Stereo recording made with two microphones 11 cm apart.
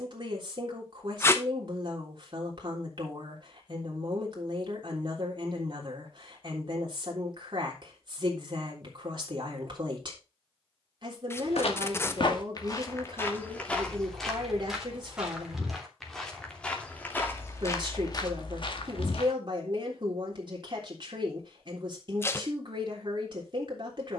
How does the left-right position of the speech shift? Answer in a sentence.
You can hear the speech stay put.